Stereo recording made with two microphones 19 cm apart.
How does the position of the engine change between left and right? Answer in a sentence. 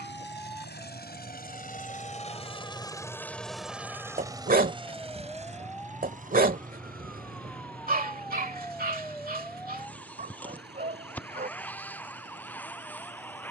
You can hear the engine go from the left side to the right.